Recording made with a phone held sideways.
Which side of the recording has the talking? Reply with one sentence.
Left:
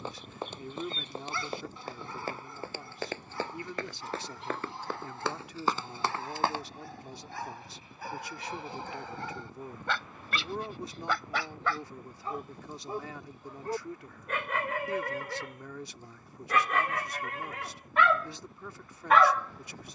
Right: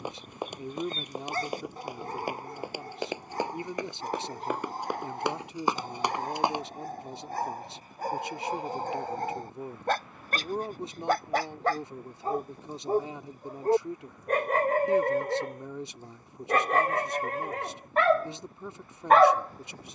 You can hear the talking on the right.